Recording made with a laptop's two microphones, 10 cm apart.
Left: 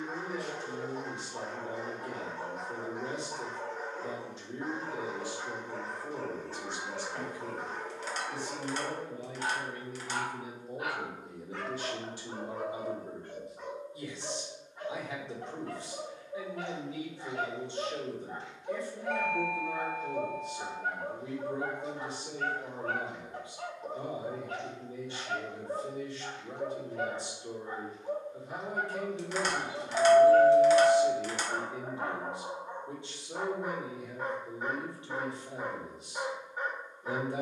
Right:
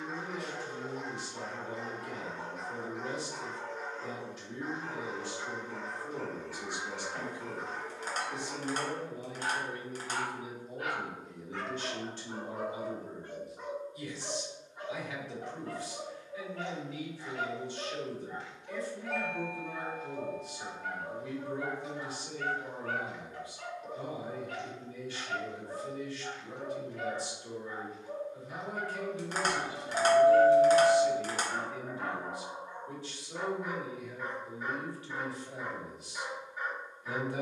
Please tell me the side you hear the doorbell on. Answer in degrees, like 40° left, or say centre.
centre.